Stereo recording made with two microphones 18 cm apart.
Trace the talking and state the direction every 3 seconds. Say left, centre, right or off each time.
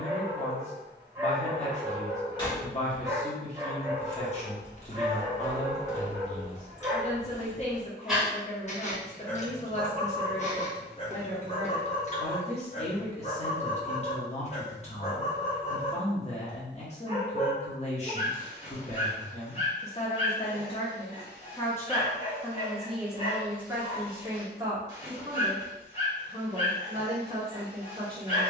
left, left, left, left, left, left, left, centre, right, right.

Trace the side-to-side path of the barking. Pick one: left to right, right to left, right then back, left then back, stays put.
right to left.